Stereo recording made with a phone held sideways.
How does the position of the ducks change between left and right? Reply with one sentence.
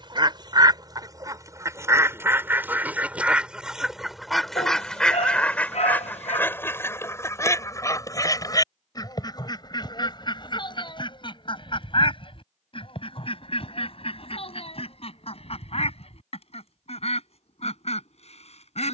In this clip you hear the ducks move from right to left.